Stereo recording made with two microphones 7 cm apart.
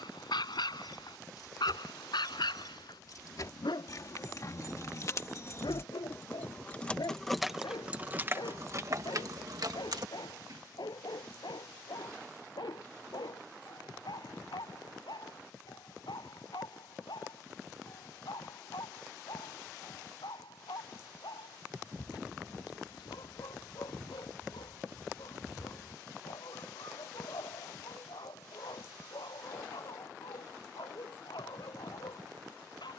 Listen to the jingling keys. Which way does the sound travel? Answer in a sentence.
In this clip you hear the jingling keys go from the left side to the right.